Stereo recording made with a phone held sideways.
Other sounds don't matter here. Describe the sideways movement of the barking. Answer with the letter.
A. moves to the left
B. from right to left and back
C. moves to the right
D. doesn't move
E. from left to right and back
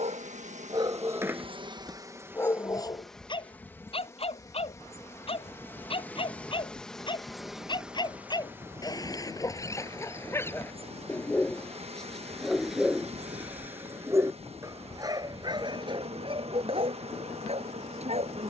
B.